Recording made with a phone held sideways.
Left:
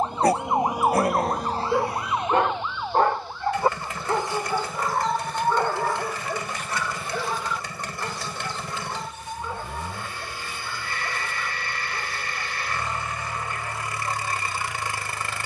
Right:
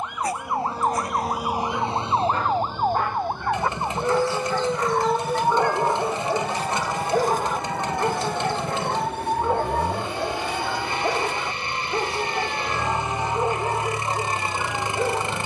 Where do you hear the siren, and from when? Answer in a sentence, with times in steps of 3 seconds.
In this clip you hear the siren in the centre from 0 s and on the right from 3 s.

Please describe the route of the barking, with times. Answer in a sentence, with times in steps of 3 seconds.
In this clip you hear the barking on the left from 0 s, in the centre from 3 s and on the right from 6 s.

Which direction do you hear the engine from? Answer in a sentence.
You can hear the engine on the right.